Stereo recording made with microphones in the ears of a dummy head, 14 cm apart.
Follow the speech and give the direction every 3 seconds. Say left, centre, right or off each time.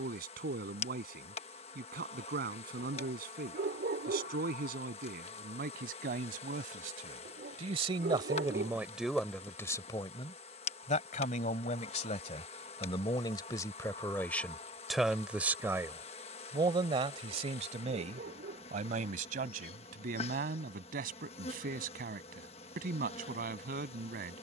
right, right, right, left, left, right, right, right.